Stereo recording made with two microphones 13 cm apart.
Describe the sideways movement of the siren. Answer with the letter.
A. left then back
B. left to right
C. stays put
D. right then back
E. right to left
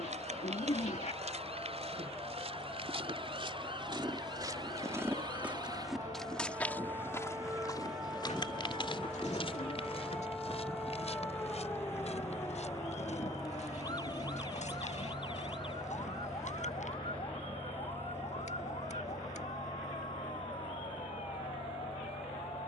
E.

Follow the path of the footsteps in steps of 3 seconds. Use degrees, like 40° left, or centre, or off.
60° right, 30° right, 30° left, 50° left, 70° left, 70° left, off, off.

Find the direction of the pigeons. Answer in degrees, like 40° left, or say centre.
60° left.